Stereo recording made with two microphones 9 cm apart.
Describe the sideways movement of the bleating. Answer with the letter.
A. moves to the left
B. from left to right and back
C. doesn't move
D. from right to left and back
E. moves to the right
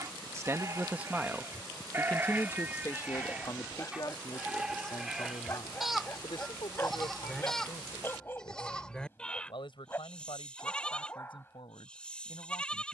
A.